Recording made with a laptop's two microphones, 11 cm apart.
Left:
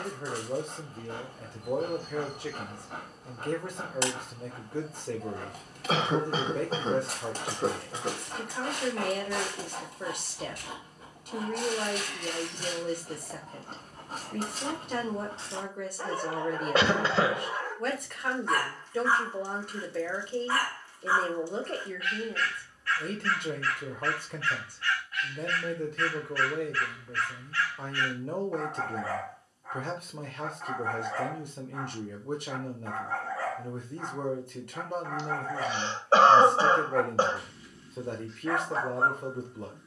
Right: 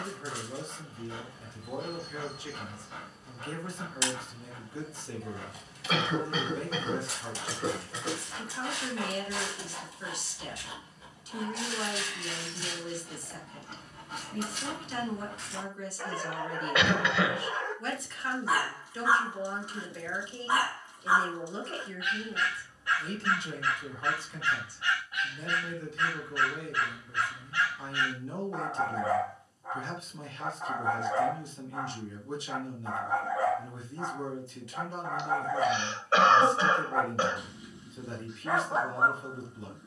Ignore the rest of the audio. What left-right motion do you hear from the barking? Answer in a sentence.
In this clip you hear the barking move from left to right.